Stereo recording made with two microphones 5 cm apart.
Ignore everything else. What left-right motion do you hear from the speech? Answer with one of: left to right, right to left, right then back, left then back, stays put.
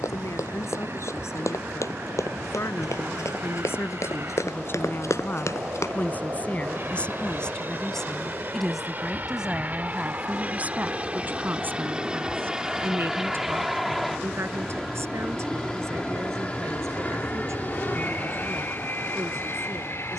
left to right.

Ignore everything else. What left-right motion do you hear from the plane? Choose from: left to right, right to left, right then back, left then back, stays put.
right to left.